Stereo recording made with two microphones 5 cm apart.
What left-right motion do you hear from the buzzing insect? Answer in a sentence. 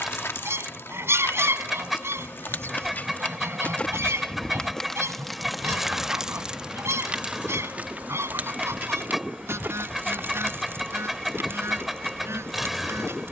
In this clip you hear the buzzing insect go from the left side to the right.